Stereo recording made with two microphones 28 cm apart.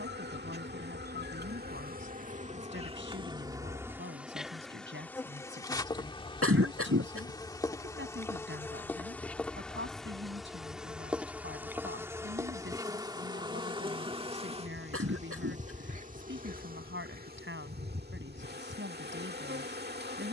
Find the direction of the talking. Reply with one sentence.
In this clip you hear the talking on the right.